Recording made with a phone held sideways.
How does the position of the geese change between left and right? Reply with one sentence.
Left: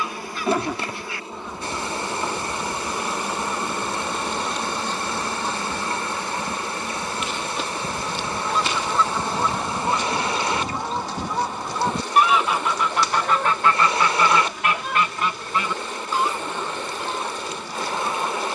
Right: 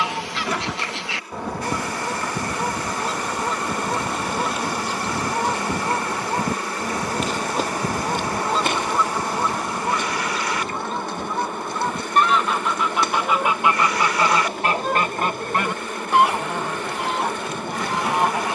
In this clip you hear the geese go left and come back.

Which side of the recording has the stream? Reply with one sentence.
You can hear the stream on the left.